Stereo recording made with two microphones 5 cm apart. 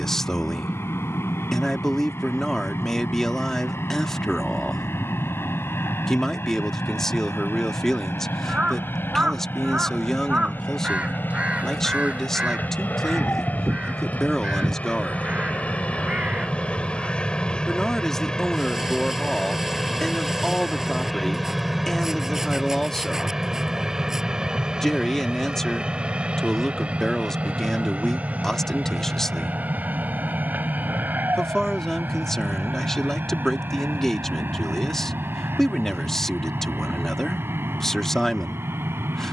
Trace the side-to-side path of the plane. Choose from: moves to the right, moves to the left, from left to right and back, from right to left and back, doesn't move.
moves to the right.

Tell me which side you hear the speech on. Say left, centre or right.
centre.